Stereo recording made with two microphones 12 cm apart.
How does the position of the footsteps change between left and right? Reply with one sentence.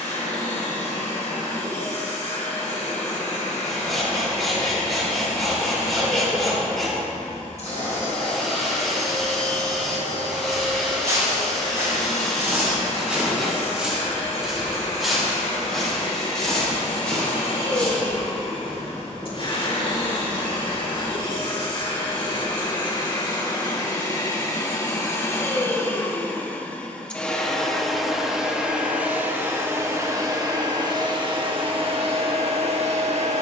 In this clip you hear the footsteps move to the left.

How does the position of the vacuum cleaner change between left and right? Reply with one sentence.
You can hear the vacuum cleaner move to the right.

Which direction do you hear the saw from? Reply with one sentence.
In this clip you hear the saw in the centre.